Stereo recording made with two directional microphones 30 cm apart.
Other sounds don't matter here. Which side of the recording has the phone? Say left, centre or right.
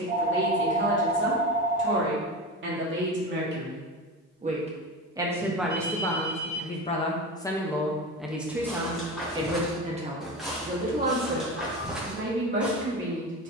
right.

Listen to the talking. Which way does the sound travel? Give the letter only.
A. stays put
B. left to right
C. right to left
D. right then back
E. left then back
E.